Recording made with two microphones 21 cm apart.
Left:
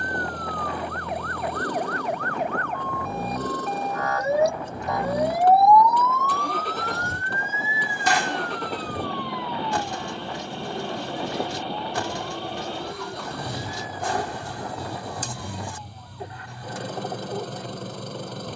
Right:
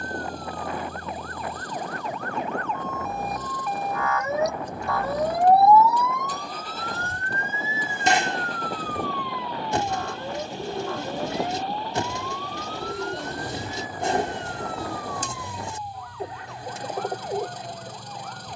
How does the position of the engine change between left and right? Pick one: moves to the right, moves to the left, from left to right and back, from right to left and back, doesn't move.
doesn't move.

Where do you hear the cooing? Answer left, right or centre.
right.